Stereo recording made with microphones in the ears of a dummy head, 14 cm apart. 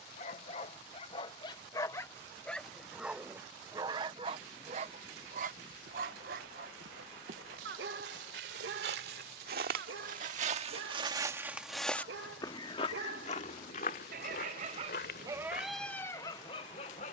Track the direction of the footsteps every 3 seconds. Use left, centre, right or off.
off, off, right, right, left, left.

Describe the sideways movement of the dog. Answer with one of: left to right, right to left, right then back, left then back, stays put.
right then back.